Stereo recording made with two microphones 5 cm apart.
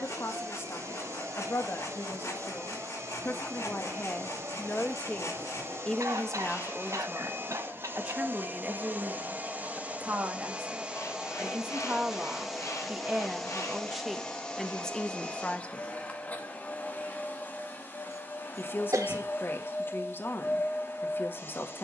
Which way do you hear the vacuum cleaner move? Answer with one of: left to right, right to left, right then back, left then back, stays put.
right to left.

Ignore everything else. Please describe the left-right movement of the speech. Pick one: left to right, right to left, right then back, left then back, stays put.
right then back.